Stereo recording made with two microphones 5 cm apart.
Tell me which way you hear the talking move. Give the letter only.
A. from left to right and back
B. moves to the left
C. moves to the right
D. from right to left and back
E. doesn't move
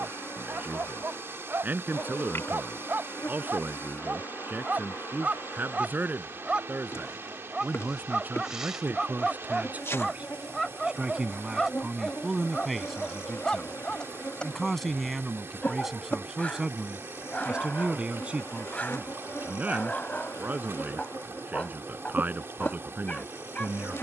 D.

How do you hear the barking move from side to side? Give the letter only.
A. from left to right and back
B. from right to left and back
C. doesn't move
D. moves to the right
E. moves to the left
E.